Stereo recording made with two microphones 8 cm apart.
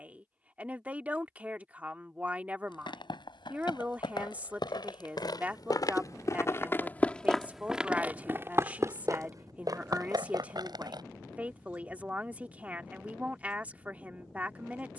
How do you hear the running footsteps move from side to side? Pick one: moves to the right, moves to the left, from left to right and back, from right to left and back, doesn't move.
moves to the right.